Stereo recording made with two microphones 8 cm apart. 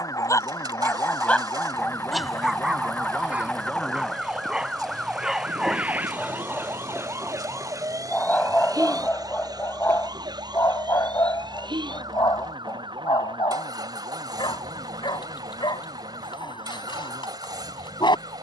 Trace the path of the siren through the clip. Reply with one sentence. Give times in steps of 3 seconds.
You can hear the siren on the left from 0 s, in the centre from 3 s and on the right from 6 s.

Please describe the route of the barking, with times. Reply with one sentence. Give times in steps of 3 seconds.
In this clip you hear the barking in the centre from 0 s and on the left from 9 s.